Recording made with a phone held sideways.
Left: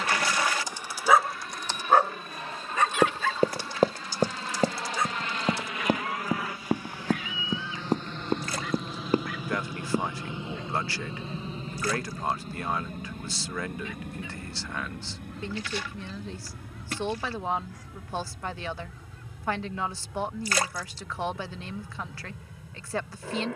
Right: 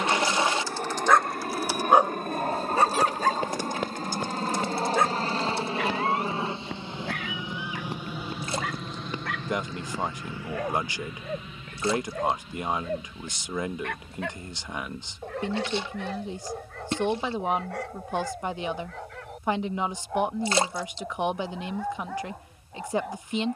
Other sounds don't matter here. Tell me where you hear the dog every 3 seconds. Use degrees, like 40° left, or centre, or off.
centre, 50° right, 70° right, 70° right, 80° right, 80° right, 80° right, 80° right.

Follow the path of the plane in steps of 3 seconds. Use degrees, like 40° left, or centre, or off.
60° right, 40° right, 20° right, 20° left, 50° left, 60° left, 70° left, 70° left.